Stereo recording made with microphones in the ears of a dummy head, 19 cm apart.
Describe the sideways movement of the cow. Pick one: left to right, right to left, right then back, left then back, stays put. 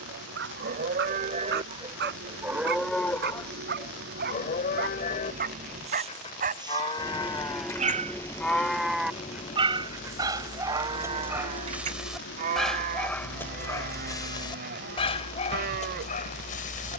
left then back.